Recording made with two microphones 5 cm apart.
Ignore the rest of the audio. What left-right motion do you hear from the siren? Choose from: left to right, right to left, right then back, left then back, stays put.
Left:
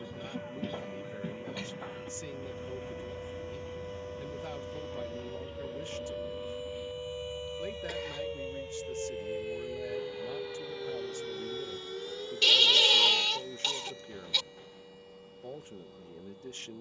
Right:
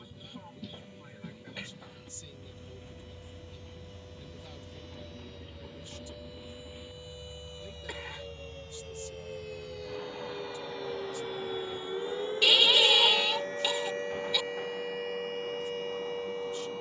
left to right.